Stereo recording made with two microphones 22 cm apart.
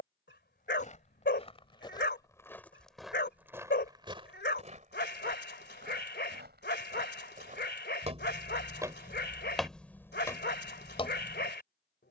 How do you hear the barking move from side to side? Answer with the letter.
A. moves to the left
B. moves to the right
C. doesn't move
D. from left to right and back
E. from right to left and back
C.